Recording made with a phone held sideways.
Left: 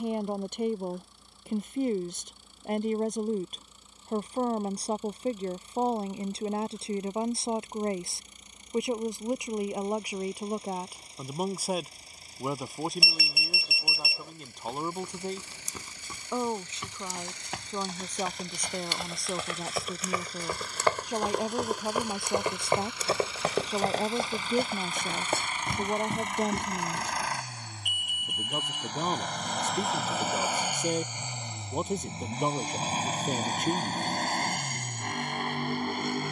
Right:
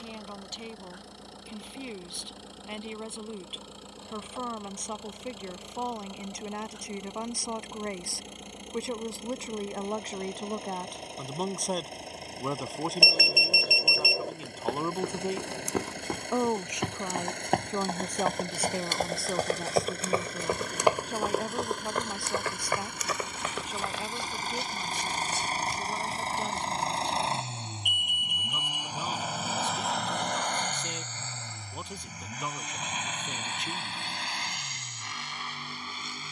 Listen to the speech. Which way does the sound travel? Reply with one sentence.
You can hear the speech move from left to right and back again.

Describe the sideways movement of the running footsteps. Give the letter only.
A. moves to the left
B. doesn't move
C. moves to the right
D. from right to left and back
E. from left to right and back
A.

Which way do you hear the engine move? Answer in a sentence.
In this clip you hear the engine move from right to left.